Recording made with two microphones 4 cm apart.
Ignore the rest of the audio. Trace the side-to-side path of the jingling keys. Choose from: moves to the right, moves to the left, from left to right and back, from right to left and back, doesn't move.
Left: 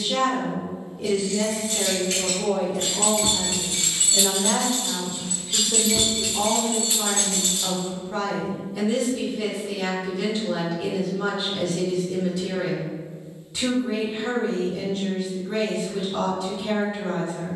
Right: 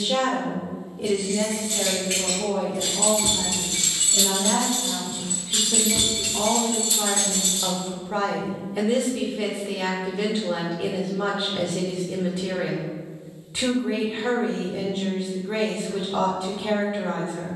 from left to right and back.